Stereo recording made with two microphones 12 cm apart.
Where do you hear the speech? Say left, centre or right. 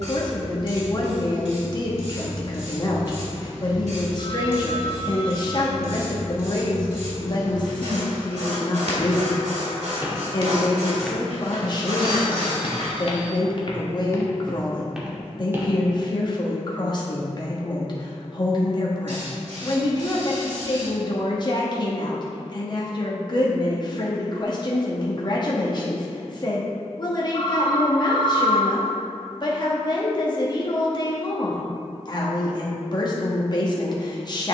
left.